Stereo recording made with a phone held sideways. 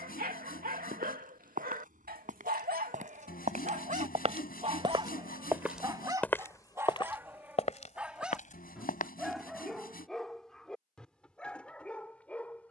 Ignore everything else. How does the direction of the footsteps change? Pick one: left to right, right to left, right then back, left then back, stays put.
right to left.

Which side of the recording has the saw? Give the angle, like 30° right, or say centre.
70° left.